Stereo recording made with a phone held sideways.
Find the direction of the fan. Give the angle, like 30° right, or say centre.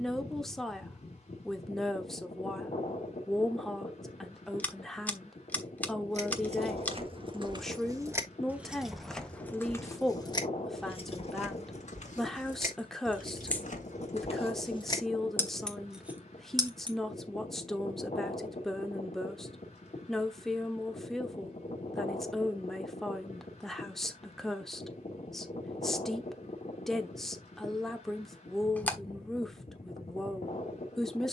40° left.